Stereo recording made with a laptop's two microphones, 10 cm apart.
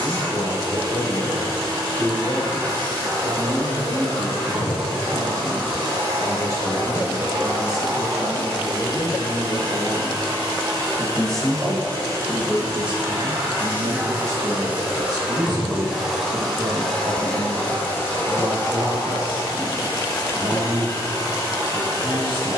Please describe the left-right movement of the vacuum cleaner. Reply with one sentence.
You can hear the vacuum cleaner travel towards the left.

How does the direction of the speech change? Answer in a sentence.
In this clip you hear the speech move to the right.